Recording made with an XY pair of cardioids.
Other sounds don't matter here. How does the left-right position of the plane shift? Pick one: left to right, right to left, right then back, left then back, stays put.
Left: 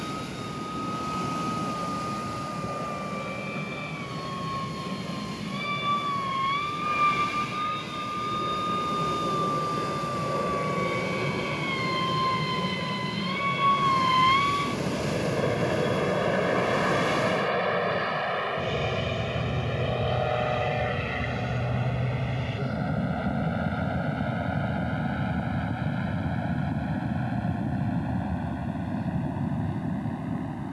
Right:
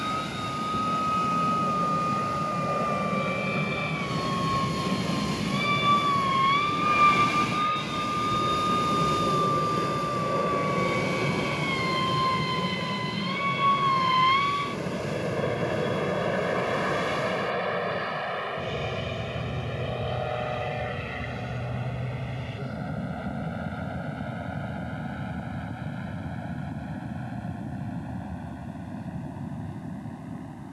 right to left.